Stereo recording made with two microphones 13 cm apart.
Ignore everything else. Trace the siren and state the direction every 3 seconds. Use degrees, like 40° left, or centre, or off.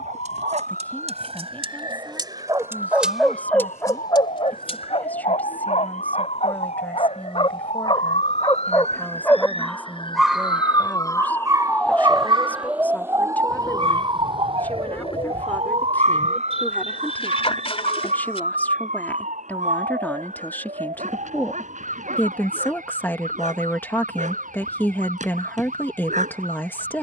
80° left, 70° left, 60° left, 30° left, 20° right, 50° right, 70° right, 70° right, 80° right.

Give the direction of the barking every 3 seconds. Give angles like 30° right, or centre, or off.
40° right, 40° left, 40° left, 10° right, 50° right, 60° right, 70° right, 70° right, 70° right.